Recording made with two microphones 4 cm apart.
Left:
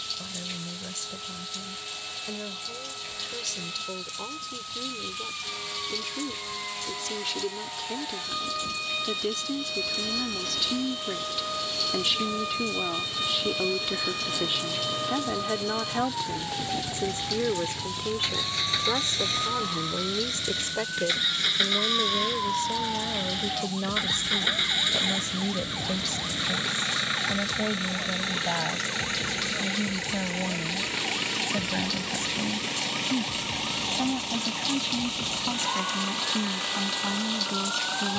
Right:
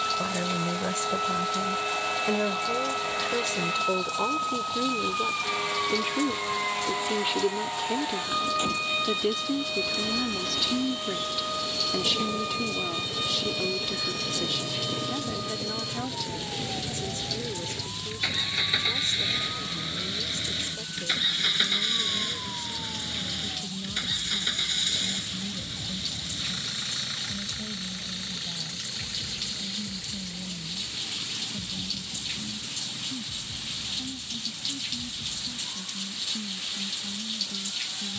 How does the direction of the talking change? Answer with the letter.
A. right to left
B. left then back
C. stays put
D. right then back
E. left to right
A.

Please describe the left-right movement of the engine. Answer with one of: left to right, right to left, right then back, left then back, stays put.
right to left.